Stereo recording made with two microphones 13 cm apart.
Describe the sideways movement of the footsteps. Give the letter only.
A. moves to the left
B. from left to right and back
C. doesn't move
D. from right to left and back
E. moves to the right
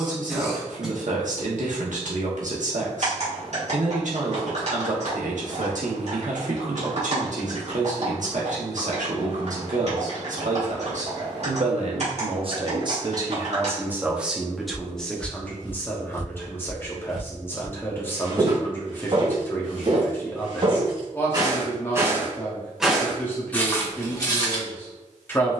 B.